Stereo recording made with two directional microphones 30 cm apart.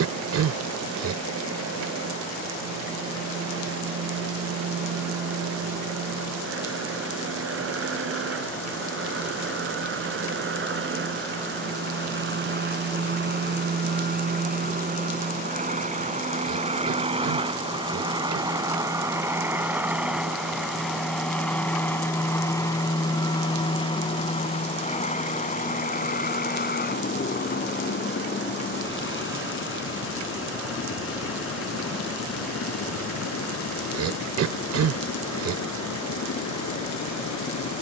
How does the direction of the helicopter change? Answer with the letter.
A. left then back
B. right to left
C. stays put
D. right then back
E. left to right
B.